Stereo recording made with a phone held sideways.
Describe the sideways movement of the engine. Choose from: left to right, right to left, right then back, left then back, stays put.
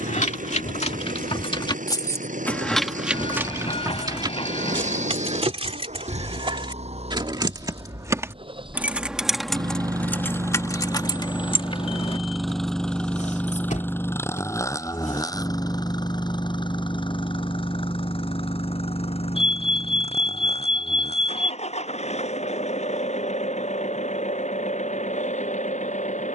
right to left.